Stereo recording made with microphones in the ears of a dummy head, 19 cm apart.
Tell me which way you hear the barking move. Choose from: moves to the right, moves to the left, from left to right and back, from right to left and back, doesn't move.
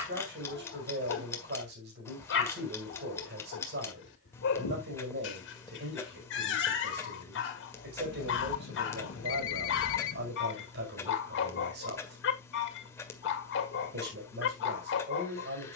doesn't move.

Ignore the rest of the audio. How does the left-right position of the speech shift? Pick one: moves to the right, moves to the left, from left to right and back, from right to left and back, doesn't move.
doesn't move.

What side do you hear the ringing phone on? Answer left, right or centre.
left.